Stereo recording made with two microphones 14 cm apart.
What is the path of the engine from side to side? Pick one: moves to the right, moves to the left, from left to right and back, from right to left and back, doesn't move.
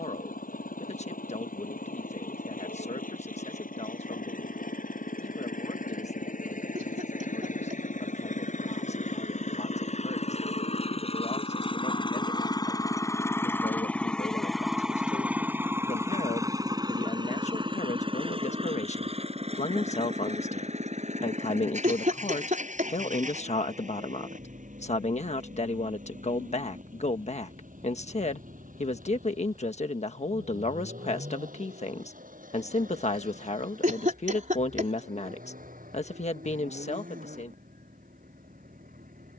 moves to the right.